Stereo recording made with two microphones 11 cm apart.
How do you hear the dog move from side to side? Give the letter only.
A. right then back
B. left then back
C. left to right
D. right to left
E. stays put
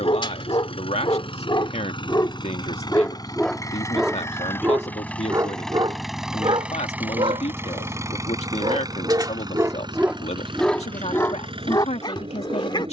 A.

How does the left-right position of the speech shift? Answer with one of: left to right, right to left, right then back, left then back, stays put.
stays put.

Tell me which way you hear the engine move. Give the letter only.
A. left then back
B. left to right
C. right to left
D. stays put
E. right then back
B.